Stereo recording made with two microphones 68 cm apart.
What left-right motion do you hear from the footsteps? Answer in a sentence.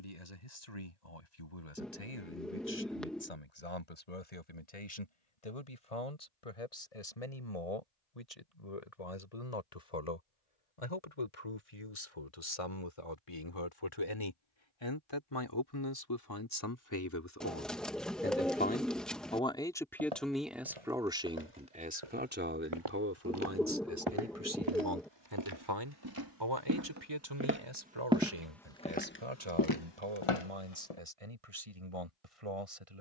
You can hear the footsteps travel towards the left.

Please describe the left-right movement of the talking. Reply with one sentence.
You can hear the talking go from the left side to the right.